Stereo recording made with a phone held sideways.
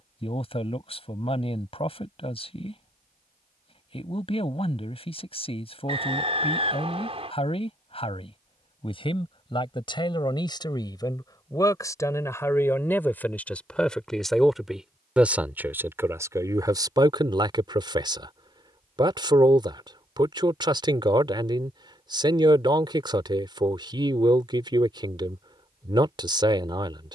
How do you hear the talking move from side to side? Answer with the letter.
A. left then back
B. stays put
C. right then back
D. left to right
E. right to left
D.